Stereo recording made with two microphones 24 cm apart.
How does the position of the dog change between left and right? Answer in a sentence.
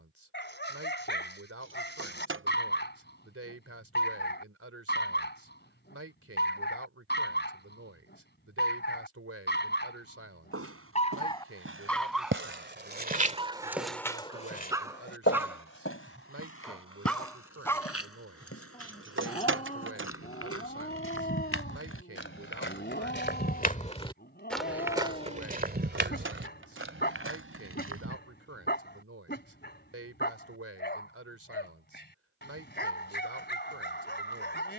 You can hear the dog move from left to right and back again.